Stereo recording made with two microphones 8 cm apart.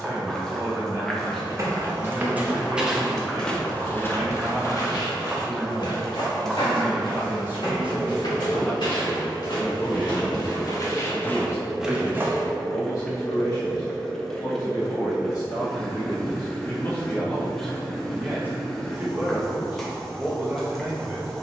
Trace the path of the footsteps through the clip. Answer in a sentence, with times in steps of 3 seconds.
You can hear the footsteps on the right from 0 s, on the left from 3 s, on the right from 12 s and not at all from 15 s.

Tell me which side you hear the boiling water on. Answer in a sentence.
In this clip you hear the boiling water in the centre.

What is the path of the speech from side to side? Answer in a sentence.
You can hear the speech move from right to left and back again.